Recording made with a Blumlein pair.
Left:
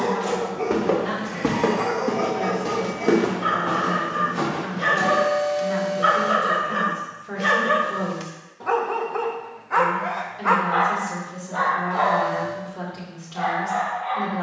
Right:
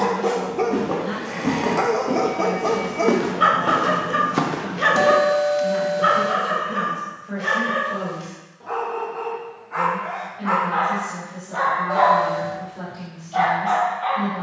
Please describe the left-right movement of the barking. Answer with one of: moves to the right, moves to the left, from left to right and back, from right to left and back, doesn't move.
from right to left and back.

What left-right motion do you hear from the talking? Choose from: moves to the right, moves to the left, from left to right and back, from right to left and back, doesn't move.
doesn't move.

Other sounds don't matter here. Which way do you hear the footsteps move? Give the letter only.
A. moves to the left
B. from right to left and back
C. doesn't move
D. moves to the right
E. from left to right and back
D.